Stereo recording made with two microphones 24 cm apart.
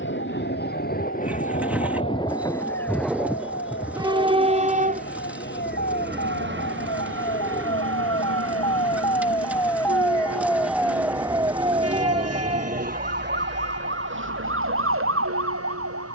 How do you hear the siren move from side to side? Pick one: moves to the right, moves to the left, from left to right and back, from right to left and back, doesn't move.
moves to the right.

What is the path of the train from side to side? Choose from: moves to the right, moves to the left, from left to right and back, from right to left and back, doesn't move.
moves to the right.